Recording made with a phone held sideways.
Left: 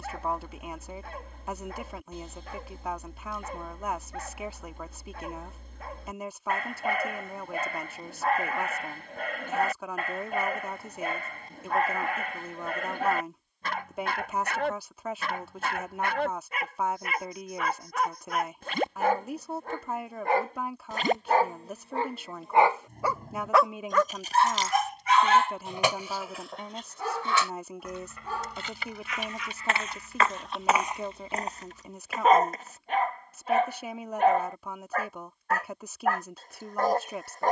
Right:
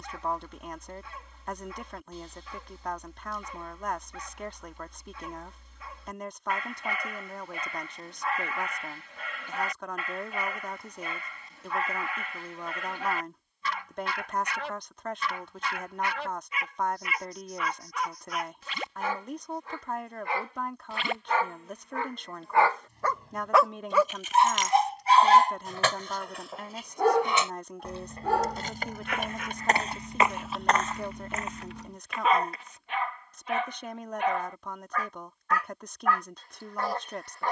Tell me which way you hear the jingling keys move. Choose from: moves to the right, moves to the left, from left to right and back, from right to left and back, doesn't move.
moves to the right.